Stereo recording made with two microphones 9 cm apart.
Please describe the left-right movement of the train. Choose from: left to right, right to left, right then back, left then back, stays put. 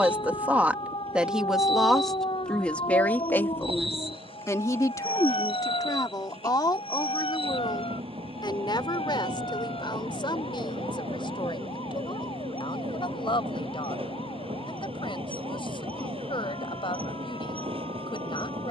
stays put.